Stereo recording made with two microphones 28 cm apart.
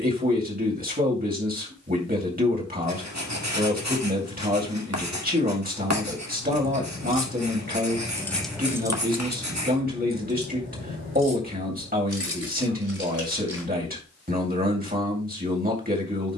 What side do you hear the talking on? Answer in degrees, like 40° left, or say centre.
30° right.